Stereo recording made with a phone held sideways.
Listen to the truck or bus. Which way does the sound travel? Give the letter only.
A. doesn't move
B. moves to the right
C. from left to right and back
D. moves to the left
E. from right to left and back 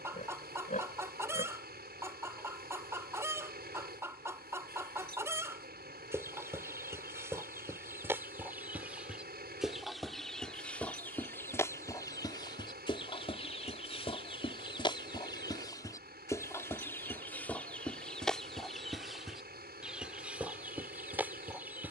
A.